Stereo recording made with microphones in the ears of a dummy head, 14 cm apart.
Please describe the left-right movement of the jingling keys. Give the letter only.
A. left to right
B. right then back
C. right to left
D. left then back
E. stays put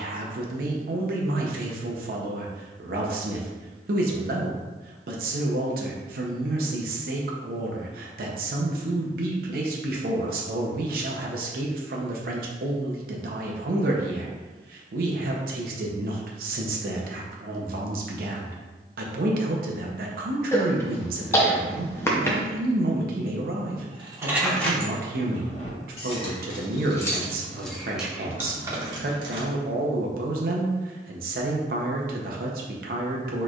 D.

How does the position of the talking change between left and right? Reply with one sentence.
You can hear the talking stay put.